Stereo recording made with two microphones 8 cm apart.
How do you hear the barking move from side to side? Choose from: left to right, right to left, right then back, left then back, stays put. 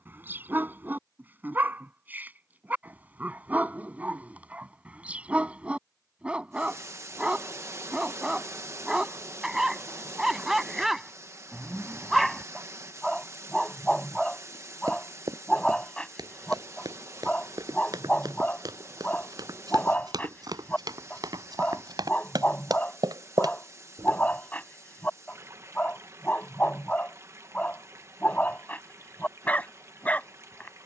right to left.